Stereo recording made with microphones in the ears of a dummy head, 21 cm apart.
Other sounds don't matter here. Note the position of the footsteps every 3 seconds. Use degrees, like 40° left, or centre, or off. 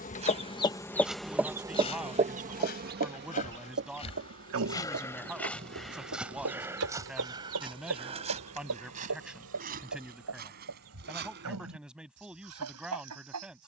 10° left, 20° left, 20° right, 40° right, off.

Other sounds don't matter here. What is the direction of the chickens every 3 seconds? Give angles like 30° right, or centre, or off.
10° right, 60° right, 70° right, 80° right, 80° right.